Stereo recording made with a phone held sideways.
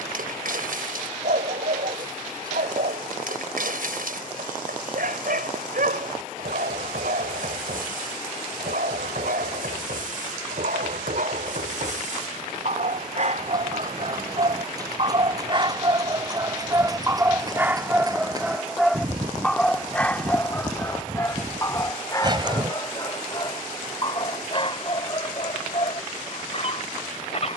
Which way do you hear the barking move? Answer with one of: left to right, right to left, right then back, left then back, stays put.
right to left.